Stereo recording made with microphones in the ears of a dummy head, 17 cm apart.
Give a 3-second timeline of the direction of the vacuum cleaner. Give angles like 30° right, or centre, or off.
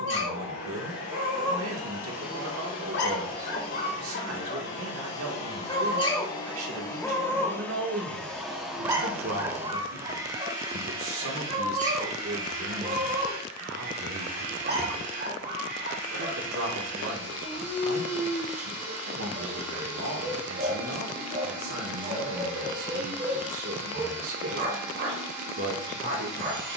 50° left, 40° left, 10° left, 20° right, 50° right, 50° right, 50° right, 50° right, 50° right.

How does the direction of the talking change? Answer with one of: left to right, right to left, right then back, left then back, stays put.
stays put.